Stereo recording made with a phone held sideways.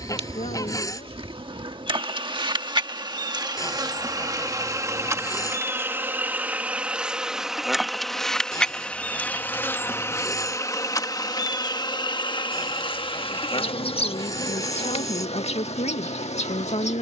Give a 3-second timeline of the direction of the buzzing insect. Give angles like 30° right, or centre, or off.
40° right, 30° right, centre, 20° left, 40° left, 60° left.